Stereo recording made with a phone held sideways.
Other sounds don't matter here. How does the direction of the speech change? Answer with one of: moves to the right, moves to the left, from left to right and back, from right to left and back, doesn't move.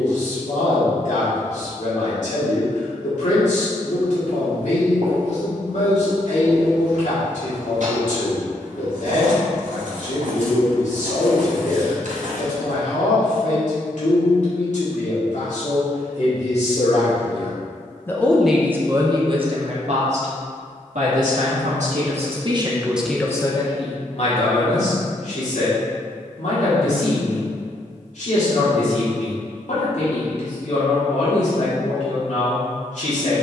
from left to right and back.